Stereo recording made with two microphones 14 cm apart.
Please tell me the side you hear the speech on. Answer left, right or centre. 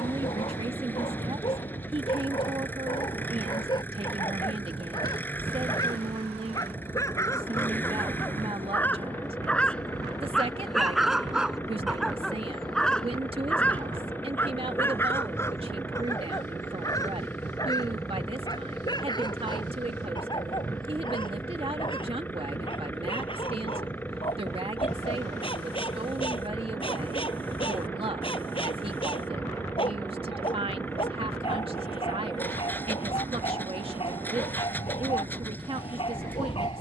right.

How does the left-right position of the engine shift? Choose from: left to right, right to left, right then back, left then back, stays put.
stays put.